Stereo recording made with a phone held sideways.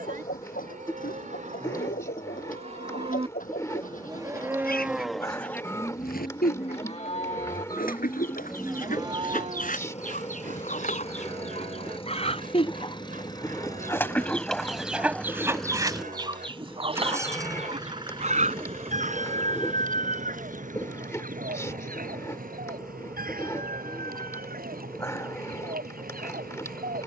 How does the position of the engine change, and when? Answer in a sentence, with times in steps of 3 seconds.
In this clip you hear the engine on the left from 0 s, in the centre from 15 s and on the right from 18 s.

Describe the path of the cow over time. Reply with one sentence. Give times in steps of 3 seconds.
In this clip you hear the cow on the right from 0 s, in the centre from 3 s, on the left from 6 s and on the right from 9 s.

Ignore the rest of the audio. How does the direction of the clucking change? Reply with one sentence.
You can hear the clucking move from left to right.